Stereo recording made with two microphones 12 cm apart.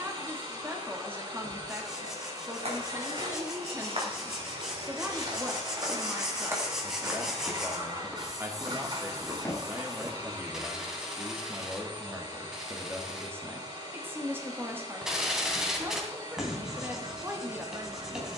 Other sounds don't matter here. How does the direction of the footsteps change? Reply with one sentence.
You can hear the footsteps travel towards the left.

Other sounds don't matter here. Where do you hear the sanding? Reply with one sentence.
You can hear the sanding in the centre.